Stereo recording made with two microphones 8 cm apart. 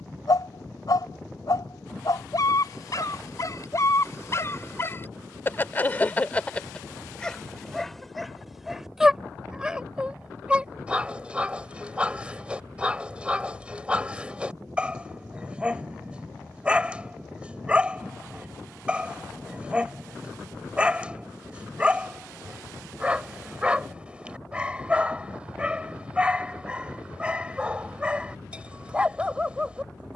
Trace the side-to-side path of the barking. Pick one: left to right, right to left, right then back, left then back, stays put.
left to right.